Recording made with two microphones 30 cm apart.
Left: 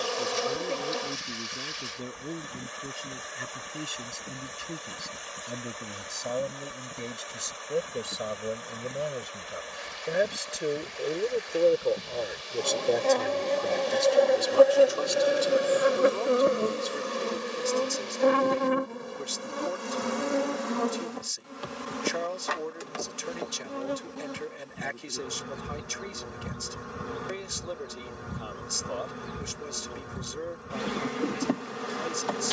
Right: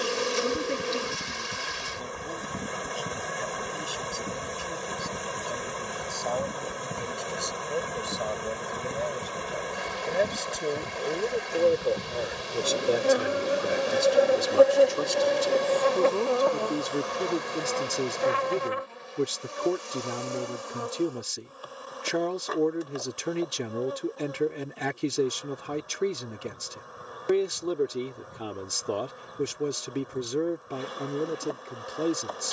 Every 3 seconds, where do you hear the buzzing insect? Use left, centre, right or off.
right, right, right, right, centre, left, left, left, left, left, left.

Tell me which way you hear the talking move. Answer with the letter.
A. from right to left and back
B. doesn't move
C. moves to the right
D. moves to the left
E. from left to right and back
C.